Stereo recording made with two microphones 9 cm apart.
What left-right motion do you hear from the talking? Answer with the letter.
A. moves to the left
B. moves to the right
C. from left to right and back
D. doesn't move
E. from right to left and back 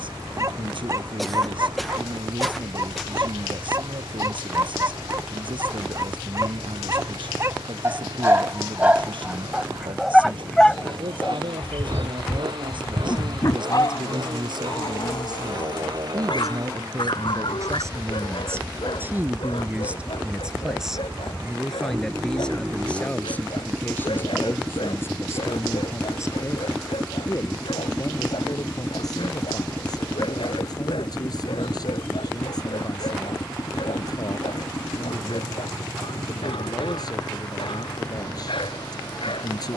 A.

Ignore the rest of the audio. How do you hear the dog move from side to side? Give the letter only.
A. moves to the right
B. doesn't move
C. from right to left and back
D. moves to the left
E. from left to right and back
D.